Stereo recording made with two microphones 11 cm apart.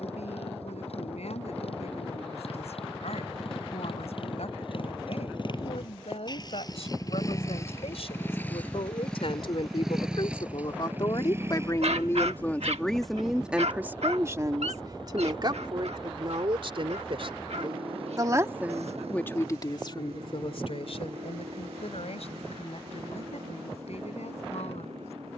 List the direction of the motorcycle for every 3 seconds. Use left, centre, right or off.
left, left, left, centre, right, right, right, right, right.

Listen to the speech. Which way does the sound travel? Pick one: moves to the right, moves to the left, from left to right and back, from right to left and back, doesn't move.
from left to right and back.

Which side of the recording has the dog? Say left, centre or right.
right.